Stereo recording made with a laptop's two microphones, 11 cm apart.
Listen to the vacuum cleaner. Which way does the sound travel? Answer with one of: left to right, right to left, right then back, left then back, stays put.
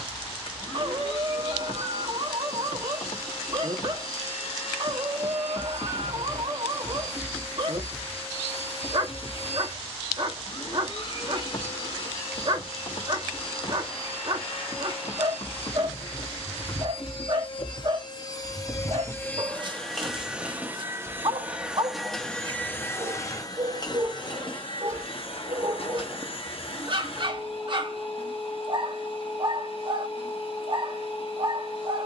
right then back.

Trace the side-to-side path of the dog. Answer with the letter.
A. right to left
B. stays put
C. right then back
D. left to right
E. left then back
B.